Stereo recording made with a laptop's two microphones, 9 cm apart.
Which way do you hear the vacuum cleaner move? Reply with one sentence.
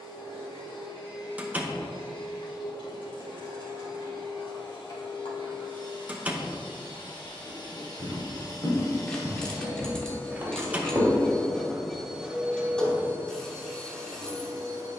You can hear the vacuum cleaner move from left to right.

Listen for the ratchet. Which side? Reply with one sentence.
In this clip you hear the ratchet in the centre.